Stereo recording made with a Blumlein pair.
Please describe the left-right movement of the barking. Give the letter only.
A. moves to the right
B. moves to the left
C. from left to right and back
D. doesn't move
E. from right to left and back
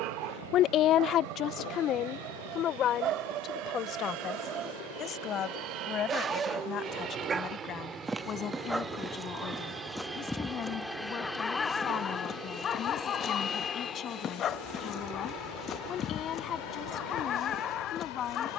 B.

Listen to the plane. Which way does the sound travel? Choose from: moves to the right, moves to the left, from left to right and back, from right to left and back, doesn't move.
moves to the left.